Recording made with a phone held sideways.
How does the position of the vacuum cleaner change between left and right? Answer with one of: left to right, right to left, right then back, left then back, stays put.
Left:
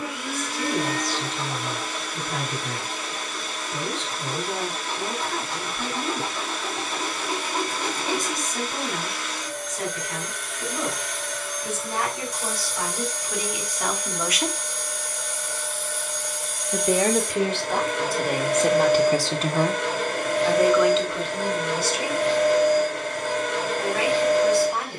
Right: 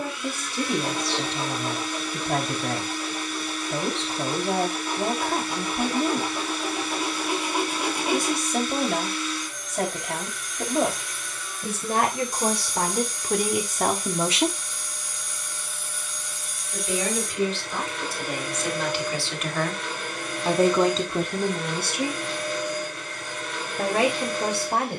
stays put.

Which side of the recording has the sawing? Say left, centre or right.
centre.